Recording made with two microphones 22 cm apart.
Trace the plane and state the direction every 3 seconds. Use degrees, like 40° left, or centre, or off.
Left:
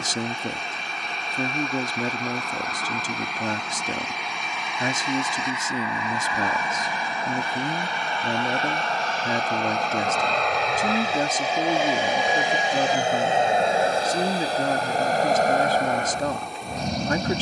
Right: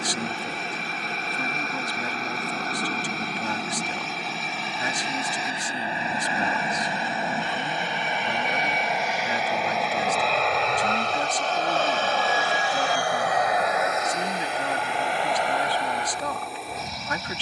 50° right, 40° right, 20° right, centre, 30° left, 50° left.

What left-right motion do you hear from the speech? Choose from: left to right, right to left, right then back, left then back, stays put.
stays put.